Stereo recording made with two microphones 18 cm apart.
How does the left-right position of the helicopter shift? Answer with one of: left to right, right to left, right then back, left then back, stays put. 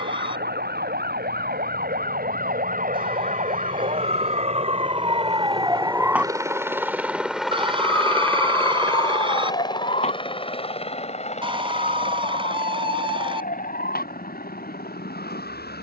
right to left.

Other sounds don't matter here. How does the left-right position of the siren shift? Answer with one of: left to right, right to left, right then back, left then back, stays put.
right to left.